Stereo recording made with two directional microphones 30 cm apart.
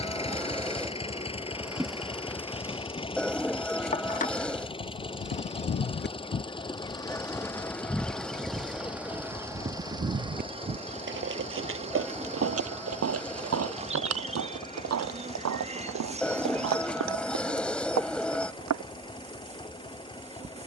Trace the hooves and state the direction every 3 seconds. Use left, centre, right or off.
off, left, centre, right, right, right, right.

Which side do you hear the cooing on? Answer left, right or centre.
centre.